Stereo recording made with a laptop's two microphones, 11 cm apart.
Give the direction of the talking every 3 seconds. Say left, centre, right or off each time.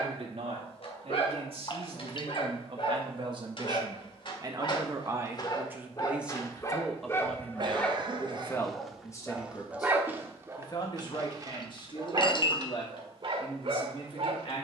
right, right, centre, left, left.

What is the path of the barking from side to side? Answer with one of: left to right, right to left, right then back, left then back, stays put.
left to right.